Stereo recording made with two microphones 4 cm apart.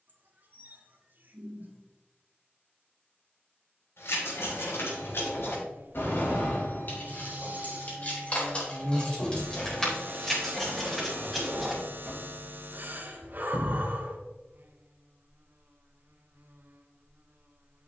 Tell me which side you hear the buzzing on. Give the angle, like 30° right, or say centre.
50° right.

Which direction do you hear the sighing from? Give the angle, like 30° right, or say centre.
40° right.